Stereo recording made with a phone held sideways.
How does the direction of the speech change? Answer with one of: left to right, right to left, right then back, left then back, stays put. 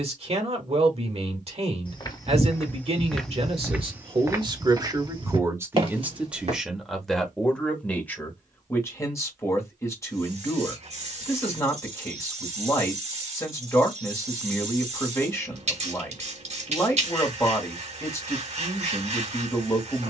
right to left.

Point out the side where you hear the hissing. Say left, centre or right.
right.